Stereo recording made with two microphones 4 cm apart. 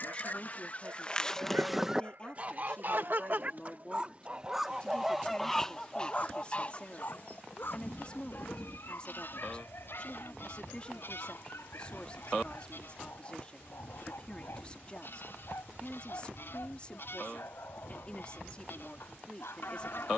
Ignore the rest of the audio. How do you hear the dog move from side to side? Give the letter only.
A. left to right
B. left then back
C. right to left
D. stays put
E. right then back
C.